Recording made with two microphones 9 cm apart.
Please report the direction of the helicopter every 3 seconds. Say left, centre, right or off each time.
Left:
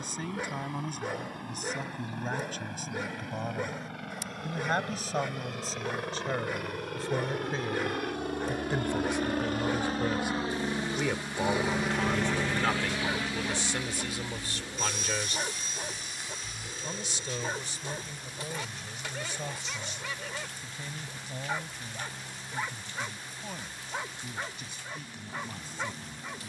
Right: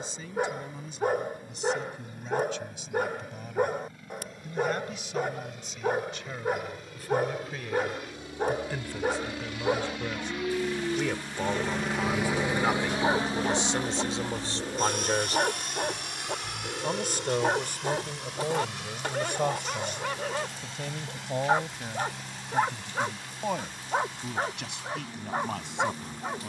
left, left, left, left, right, right, right, right, right.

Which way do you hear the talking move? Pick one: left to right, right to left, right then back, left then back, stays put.
left to right.